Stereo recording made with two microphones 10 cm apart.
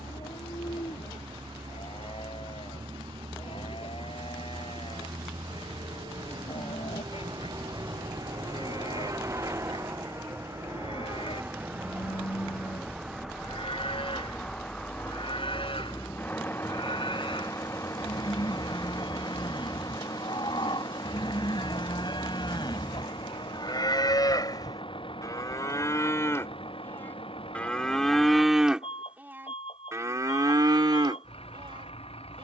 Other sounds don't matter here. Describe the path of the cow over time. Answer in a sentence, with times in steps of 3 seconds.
In this clip you hear the cow on the left from 0 s, in the centre from 27 s and on the right from 30 s.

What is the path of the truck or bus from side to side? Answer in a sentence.
In this clip you hear the truck or bus move to the left.